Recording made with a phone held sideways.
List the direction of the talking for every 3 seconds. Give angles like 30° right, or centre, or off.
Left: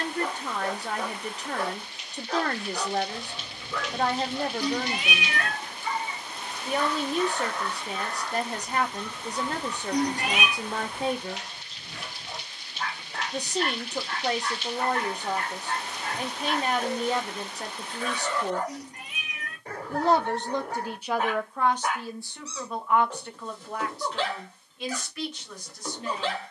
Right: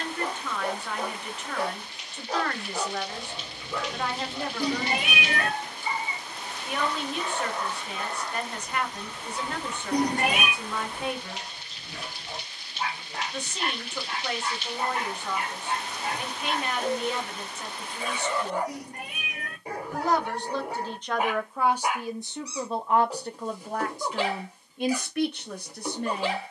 40° left, 40° left, 40° left, 40° left, 40° left, 40° left, 30° left, 20° right, 60° right.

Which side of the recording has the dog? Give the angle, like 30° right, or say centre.
10° right.